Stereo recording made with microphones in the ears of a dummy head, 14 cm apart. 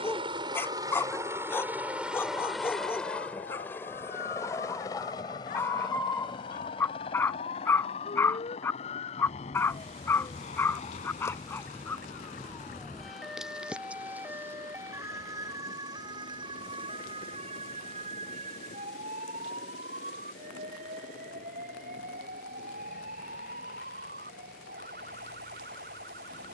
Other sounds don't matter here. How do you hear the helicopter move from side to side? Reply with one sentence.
In this clip you hear the helicopter move to the left.